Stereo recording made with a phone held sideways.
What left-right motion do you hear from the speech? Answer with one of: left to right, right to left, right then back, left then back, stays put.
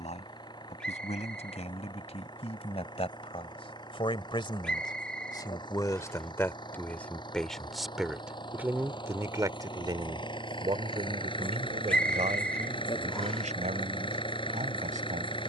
left to right.